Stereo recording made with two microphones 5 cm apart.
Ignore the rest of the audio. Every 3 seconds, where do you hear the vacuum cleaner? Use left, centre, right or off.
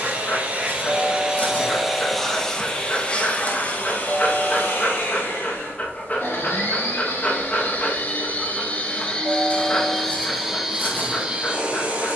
centre, left, left, centre.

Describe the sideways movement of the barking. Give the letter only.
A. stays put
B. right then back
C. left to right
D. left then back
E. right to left
A.